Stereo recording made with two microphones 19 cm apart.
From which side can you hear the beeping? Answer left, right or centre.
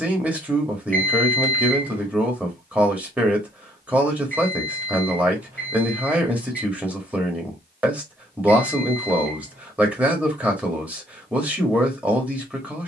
right.